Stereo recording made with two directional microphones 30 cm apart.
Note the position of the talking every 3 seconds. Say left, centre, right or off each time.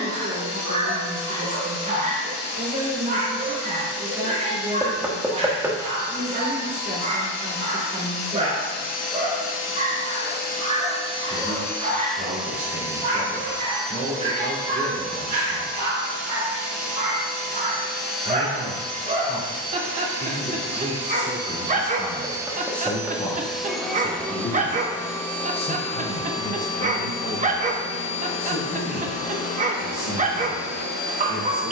right, right, right, right, right, right, right, centre, left, left, left.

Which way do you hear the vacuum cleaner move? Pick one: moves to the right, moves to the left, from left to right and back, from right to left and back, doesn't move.
from left to right and back.